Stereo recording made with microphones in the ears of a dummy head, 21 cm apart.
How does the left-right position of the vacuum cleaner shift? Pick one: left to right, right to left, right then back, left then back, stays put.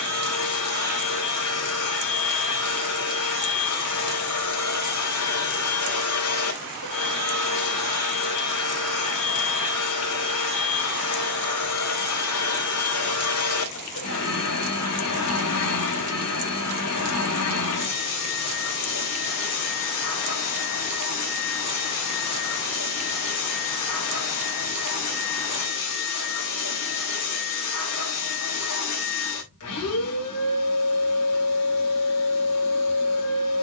stays put.